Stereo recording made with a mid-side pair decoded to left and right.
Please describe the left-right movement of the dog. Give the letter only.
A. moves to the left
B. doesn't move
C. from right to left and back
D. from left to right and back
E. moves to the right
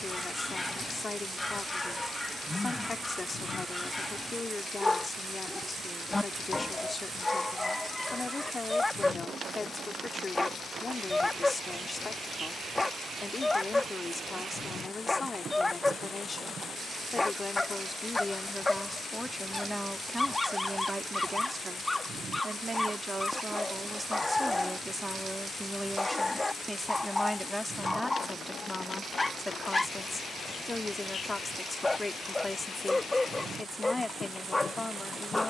B.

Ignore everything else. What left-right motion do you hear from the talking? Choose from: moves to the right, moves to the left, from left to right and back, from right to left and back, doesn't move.
from left to right and back.